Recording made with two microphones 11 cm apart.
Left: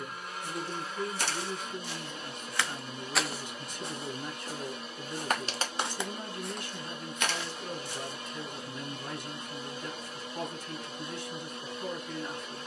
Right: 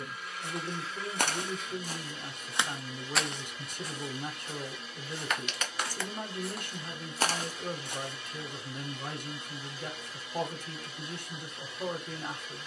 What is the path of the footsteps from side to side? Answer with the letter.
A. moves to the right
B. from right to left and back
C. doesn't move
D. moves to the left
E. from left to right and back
B.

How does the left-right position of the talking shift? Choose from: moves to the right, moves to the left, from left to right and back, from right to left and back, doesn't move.
doesn't move.